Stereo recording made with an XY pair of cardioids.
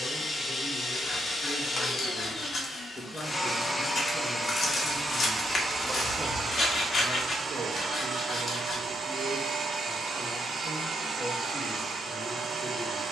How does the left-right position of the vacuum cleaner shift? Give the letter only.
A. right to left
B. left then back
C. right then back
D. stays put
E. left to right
E.